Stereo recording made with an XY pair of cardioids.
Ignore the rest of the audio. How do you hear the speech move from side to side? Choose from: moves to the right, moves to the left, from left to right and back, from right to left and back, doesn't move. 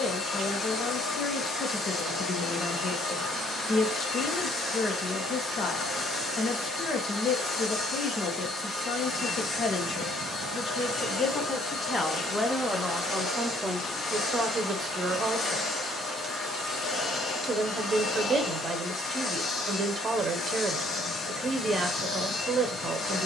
moves to the right.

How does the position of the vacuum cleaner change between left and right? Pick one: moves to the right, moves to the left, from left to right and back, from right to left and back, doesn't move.
doesn't move.